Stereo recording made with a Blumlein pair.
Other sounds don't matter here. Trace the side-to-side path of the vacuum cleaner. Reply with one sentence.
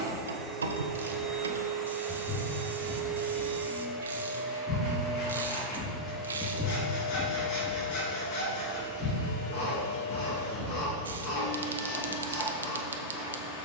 In this clip you hear the vacuum cleaner travel towards the left.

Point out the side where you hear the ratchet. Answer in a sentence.
You can hear the ratchet on the right.